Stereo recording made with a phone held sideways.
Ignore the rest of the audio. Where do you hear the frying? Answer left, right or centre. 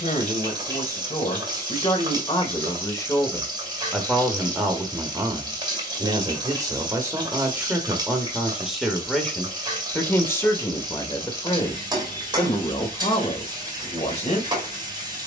right.